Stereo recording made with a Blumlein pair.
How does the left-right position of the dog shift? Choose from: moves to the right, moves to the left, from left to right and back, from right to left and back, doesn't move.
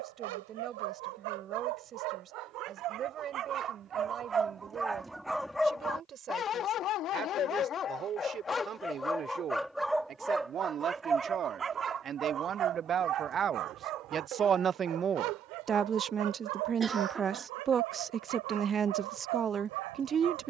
from right to left and back.